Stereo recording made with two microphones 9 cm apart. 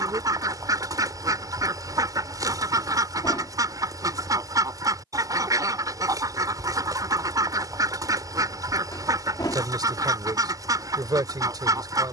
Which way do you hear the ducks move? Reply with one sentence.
In this clip you hear the ducks stay in one place.